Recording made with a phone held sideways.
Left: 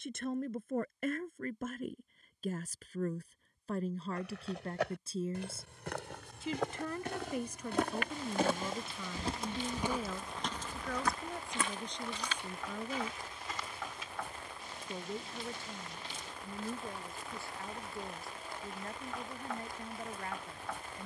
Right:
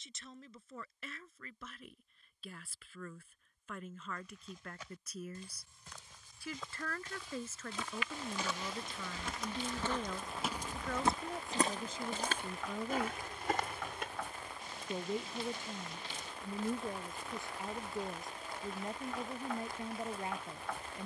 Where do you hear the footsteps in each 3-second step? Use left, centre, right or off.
off, left, left, centre, right, off, off.